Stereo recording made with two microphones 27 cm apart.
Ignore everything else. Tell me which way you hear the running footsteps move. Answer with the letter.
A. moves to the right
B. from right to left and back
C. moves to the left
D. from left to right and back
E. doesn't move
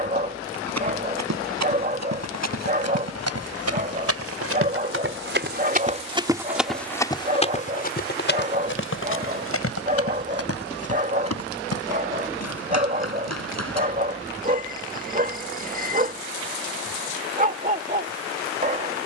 C.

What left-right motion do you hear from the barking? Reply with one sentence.
In this clip you hear the barking stay in one place.